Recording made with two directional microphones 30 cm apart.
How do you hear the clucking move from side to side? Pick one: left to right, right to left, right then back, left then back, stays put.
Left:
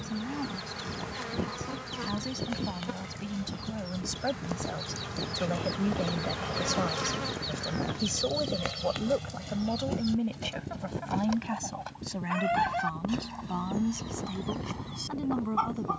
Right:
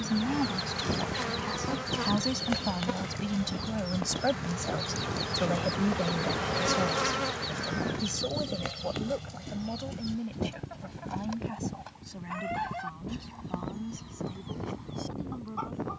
right to left.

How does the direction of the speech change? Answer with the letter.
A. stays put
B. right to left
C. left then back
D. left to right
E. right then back
B.